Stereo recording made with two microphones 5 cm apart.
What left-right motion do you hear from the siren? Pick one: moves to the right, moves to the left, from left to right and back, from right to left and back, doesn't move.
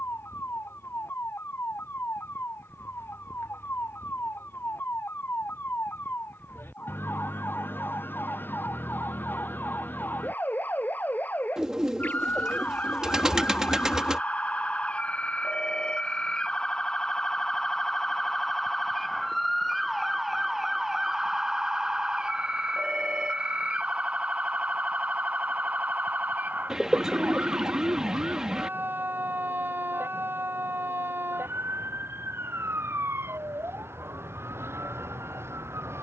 moves to the right.